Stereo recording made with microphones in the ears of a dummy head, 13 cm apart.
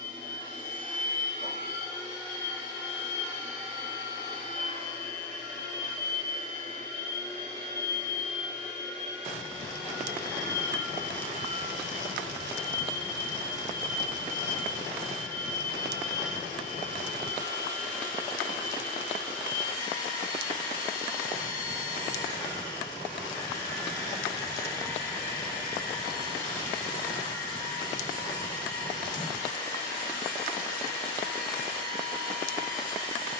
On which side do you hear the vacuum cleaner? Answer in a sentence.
You can hear the vacuum cleaner on the left.